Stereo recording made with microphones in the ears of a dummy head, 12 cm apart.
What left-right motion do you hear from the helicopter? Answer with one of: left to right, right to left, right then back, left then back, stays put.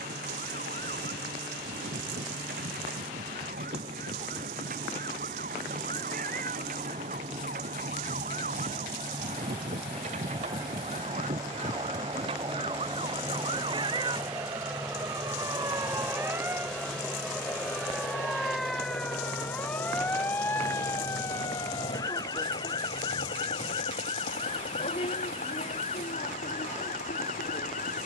right to left.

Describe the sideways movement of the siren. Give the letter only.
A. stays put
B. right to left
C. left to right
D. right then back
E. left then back
B.